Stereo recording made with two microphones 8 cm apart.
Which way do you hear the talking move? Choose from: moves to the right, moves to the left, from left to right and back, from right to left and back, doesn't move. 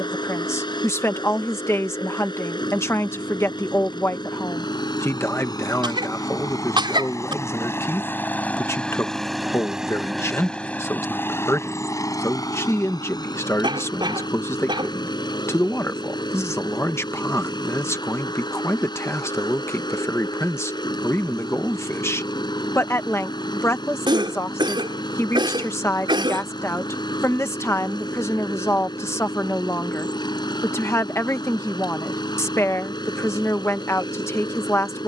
doesn't move.